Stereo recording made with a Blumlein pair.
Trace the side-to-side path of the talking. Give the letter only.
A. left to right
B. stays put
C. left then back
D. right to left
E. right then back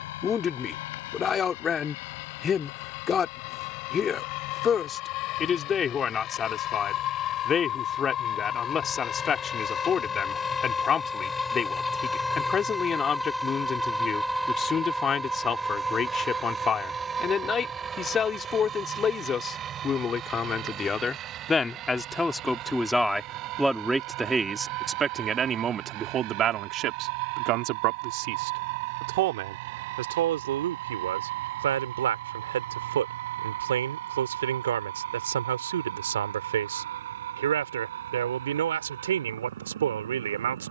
A.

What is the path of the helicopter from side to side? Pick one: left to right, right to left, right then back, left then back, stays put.
left to right.